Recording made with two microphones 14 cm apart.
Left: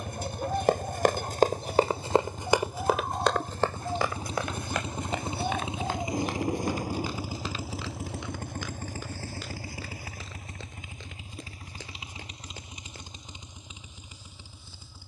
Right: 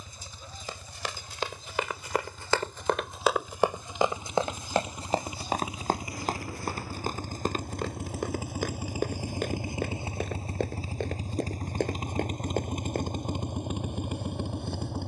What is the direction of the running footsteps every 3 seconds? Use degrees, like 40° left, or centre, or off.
40° left, 30° right, 50° right, 50° right, 60° right.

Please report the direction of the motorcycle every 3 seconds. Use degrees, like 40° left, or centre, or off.
50° left, 30° left, 10° left, 30° right, 60° right.